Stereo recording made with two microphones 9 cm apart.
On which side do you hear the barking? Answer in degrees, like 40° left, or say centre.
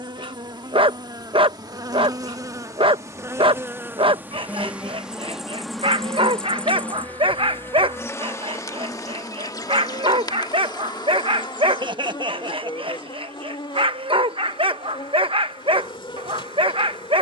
70° right.